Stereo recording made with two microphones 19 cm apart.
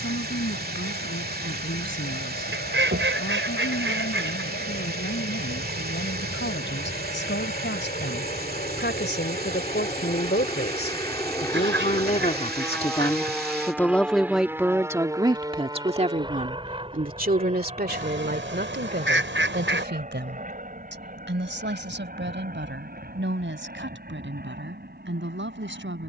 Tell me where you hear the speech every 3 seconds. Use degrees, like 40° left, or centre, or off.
80° left, 80° left, 70° left, 50° left, 10° left, 40° right, 60° right, 70° right, 80° right.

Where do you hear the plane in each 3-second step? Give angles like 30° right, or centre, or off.
80° left, 70° left, 50° left, 30° left, centre, 20° right, 40° right, 40° right, 50° right.